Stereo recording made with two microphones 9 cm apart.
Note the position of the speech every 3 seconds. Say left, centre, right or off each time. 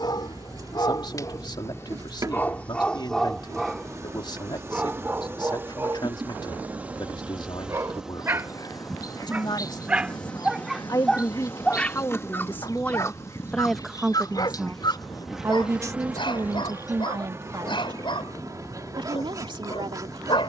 left, left, left, left, centre, right, right.